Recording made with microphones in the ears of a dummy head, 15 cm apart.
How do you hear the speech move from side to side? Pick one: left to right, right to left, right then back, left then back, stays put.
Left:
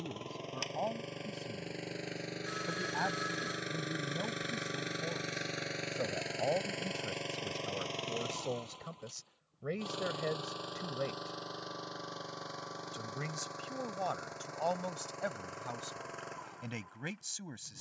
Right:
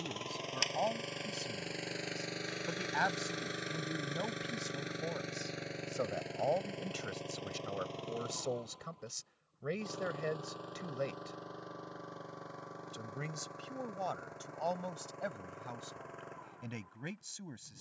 right to left.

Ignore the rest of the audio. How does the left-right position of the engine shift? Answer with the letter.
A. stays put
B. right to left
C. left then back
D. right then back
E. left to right
B.